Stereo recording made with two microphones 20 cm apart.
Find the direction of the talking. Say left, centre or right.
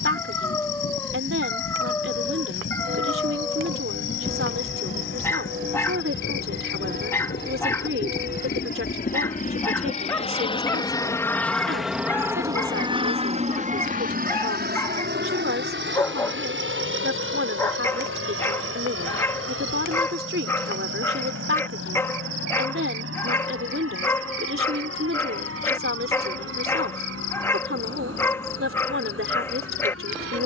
right.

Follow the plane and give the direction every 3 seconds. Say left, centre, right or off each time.
left, left, left, left, right, right, right, right, right, right.